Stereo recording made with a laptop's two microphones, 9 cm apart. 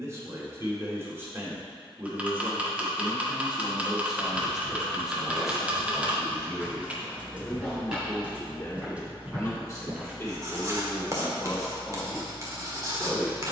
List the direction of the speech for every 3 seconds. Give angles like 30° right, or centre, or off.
20° right, 10° right, 20° left, 20° left, 20° right.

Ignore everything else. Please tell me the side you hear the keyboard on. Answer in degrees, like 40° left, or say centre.
10° right.